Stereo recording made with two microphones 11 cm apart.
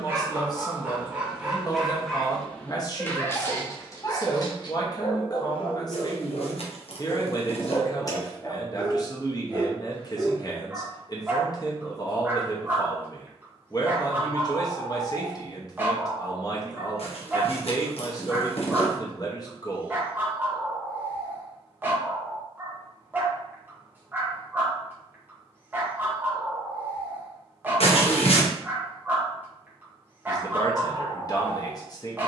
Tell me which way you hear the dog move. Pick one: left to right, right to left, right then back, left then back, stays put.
left then back.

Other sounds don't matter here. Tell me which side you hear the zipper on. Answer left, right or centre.
left.